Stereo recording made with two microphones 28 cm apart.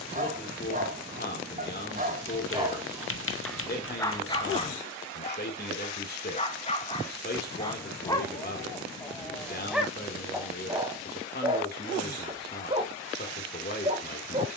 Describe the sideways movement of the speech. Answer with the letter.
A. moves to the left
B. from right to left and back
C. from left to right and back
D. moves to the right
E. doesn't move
E.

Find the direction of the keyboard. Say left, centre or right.
left.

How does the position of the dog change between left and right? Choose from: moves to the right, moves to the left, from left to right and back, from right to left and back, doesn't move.
from right to left and back.